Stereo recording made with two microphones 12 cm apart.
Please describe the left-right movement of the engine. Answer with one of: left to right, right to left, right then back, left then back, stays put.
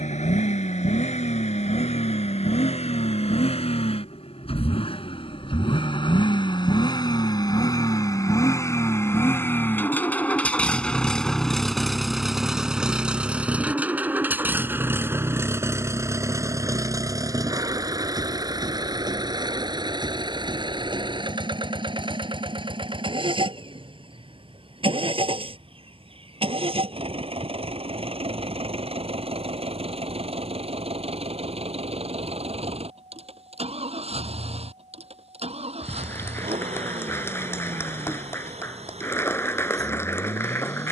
left to right.